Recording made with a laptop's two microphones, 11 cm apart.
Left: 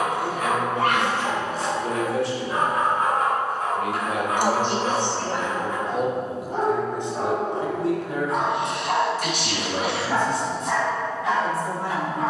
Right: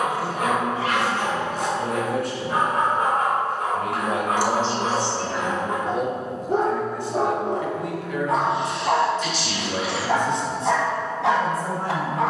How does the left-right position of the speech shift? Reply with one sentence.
In this clip you hear the speech move from right to left and back again.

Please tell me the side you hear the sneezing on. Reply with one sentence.
You can hear the sneezing on the left.